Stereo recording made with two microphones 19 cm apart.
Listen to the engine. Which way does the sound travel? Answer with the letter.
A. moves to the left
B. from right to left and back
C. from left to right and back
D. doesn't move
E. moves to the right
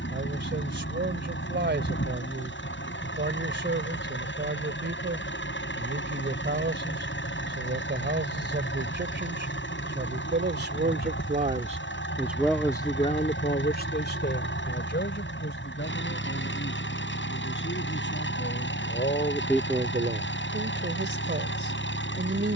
D.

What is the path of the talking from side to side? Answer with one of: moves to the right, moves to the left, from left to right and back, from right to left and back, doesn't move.
from right to left and back.